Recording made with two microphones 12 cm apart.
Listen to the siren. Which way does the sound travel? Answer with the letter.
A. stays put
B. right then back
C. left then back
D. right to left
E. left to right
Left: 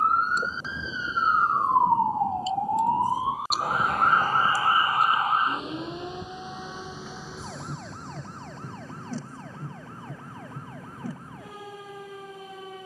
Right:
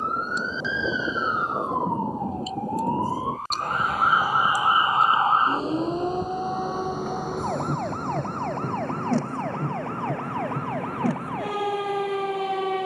E.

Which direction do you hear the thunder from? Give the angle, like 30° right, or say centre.
80° right.